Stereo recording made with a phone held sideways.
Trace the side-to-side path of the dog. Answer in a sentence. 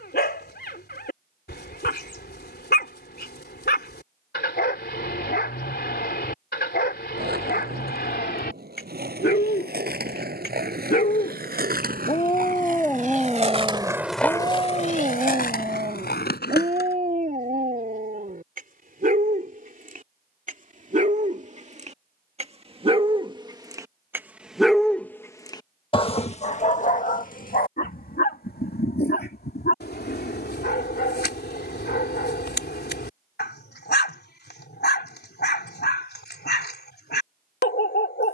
In this clip you hear the dog go right and come back.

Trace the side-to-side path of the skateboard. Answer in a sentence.
In this clip you hear the skateboard move from right to left.